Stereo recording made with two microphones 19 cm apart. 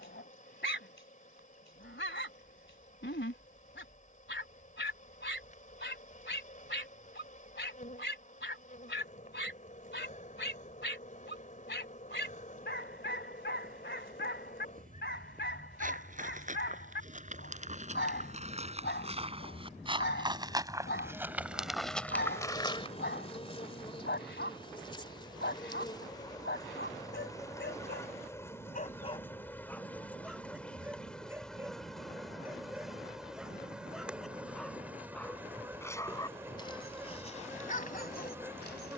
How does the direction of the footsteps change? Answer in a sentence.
You can hear the footsteps travel towards the left.